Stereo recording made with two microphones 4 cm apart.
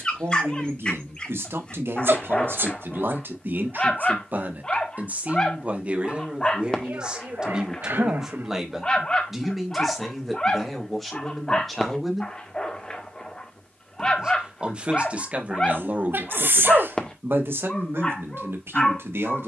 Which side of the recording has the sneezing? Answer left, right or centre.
right.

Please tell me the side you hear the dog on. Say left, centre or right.
left.